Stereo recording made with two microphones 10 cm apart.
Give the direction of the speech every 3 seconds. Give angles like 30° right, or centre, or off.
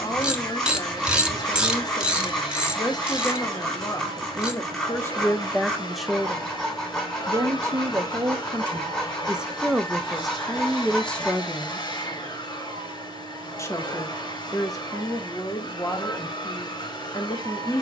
40° left, 30° left, 20° right, centre, 30° left, 40° left.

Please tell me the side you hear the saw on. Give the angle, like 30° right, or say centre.
10° left.